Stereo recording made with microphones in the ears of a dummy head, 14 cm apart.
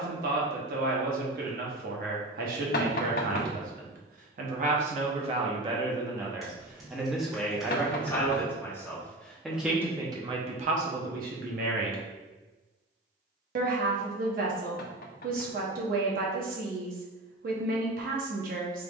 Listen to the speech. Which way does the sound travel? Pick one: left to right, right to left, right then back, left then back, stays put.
left then back.